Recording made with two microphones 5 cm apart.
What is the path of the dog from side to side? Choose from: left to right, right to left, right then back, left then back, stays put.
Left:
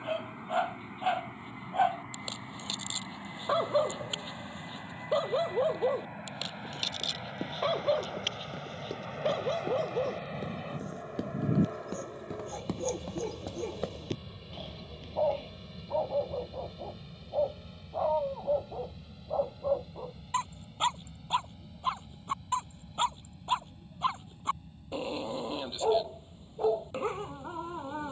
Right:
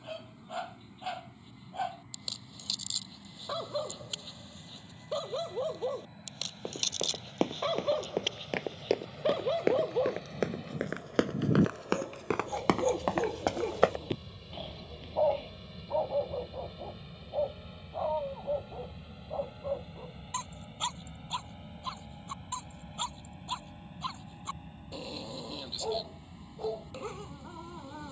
right then back.